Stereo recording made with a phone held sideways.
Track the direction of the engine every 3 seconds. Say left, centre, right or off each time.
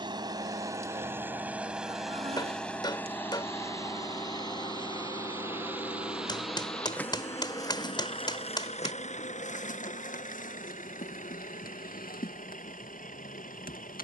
centre, left, left, left, left.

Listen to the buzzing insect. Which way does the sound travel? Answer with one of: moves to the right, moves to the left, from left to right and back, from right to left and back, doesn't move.
moves to the left.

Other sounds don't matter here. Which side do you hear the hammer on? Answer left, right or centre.
left.